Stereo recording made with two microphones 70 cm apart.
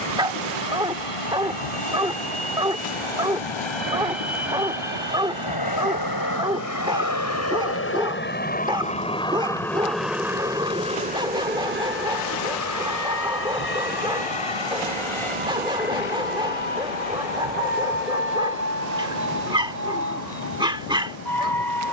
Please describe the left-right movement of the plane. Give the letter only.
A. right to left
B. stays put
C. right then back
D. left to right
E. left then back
D.